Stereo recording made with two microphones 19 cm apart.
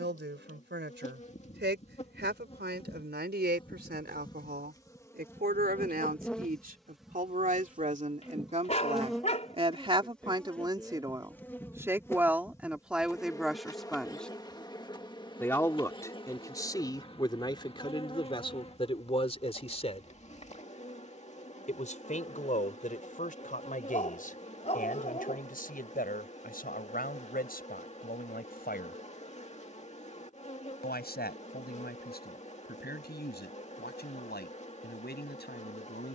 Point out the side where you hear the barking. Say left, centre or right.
left.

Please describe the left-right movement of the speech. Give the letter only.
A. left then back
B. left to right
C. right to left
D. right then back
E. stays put
C.